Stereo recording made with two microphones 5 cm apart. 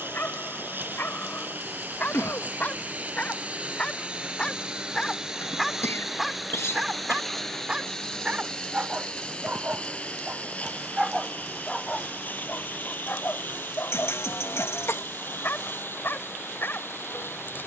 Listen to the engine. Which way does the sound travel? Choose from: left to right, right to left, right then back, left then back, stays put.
right to left.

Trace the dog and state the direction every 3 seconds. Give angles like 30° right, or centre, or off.
50° left, 20° left, 20° right, 10° right, 50° left, 50° left.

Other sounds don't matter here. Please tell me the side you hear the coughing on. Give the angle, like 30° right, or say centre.
70° left.